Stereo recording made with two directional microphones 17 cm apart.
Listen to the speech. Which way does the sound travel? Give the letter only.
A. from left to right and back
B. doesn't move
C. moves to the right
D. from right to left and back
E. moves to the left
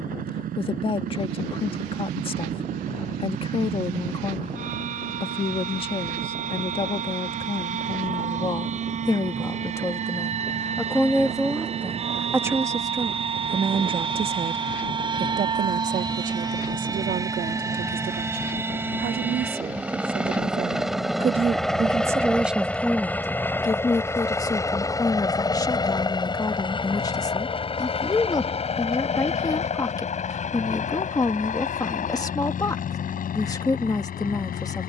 A.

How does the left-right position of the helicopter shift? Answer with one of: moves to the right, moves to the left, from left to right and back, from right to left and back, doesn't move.
moves to the left.